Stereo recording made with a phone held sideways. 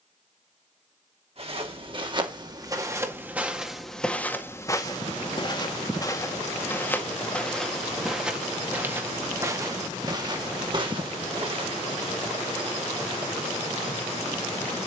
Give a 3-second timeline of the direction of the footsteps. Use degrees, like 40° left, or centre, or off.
30° right, 10° left, 10° left, 30° right, off.